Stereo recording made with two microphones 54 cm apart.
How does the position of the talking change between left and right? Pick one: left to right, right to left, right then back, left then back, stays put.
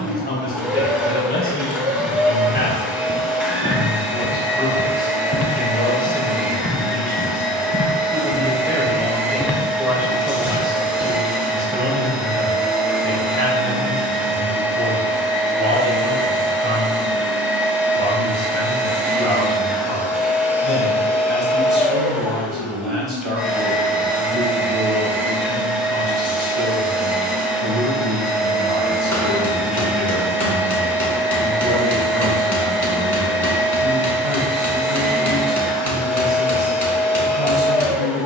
left to right.